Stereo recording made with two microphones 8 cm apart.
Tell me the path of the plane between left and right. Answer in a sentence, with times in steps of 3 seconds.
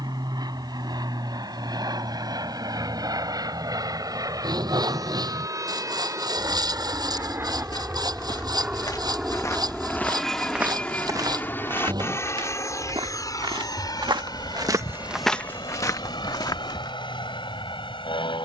You can hear the plane on the right from 0 s, in the centre from 9 s and on the left from 12 s.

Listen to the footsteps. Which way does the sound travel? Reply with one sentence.
In this clip you hear the footsteps move from left to right and back again.